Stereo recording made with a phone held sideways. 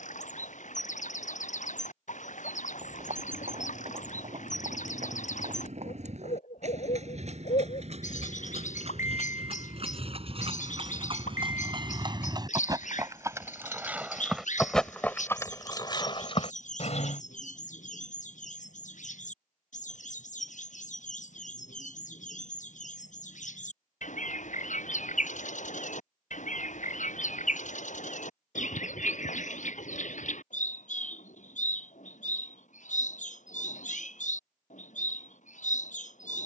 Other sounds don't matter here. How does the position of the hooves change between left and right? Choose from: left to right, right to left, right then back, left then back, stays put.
right to left.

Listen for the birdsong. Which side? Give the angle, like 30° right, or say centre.
60° left.